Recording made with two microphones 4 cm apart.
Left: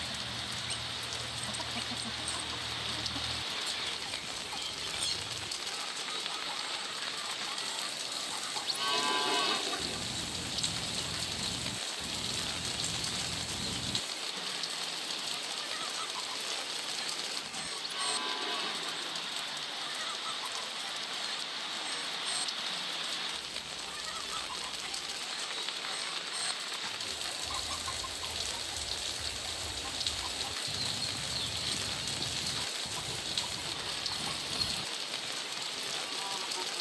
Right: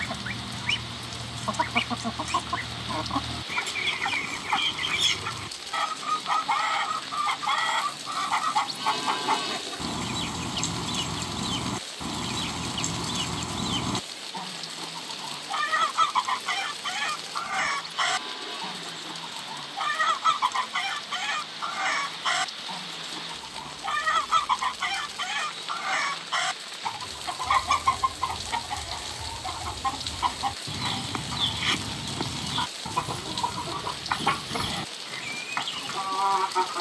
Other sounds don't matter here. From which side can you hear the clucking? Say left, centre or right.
right.